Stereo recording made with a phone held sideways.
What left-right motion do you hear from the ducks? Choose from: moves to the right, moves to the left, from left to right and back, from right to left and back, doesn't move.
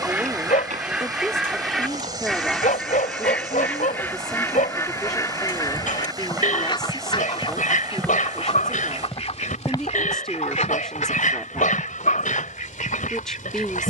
moves to the left.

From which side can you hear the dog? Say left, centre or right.
left.